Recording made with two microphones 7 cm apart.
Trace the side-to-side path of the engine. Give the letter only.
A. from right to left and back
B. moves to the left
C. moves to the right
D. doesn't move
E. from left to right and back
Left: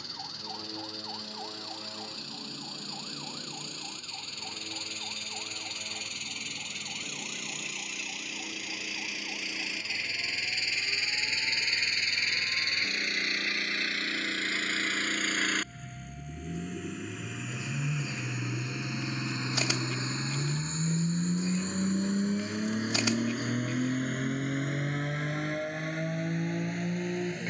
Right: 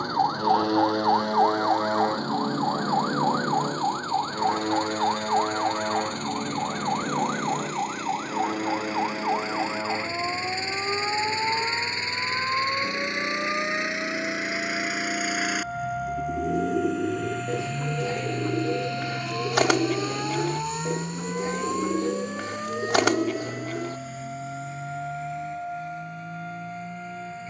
B.